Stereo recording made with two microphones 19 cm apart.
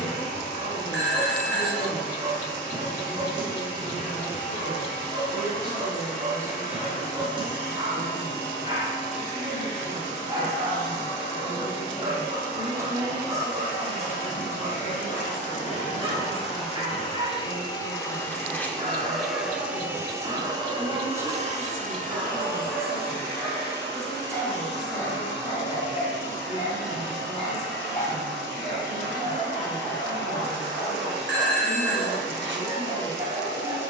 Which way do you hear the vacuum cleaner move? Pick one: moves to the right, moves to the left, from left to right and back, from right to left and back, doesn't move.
moves to the right.